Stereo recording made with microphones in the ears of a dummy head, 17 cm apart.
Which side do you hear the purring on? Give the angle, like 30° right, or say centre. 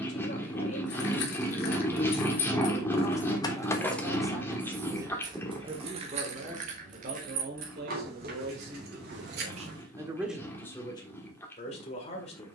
10° left.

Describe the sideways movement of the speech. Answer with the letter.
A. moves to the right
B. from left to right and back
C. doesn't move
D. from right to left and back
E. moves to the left
B.